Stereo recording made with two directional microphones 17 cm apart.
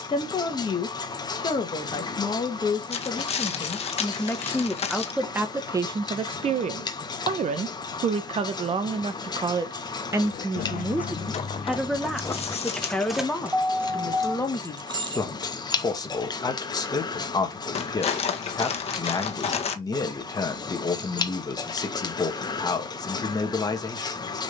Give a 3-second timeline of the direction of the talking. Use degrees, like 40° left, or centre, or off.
30° left, centre, 40° right, 10° right, 10° left, 20° left, 20° left, 20° left.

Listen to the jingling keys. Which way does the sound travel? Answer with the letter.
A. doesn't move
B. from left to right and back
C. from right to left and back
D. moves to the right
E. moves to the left
D.